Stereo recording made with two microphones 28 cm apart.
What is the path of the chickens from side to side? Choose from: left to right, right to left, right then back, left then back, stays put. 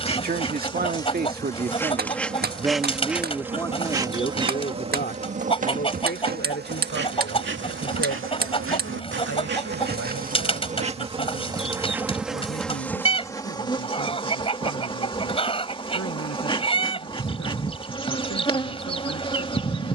stays put.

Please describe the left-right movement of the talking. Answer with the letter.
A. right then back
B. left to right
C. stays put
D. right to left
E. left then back
D.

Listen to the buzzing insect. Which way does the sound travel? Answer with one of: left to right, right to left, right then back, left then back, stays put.
right then back.